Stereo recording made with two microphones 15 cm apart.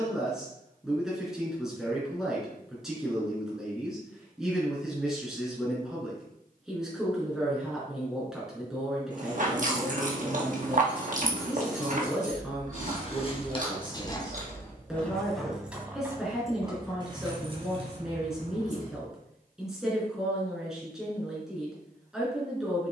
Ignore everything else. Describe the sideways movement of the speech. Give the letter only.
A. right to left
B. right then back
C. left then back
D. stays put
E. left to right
D.